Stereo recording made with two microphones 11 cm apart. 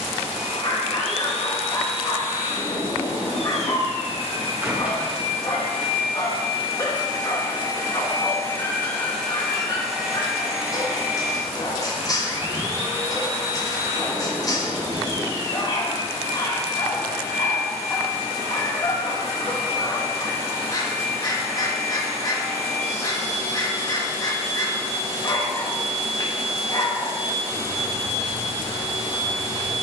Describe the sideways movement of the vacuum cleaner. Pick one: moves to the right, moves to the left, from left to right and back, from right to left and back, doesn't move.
moves to the right.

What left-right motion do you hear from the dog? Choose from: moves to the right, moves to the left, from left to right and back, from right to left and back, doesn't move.
doesn't move.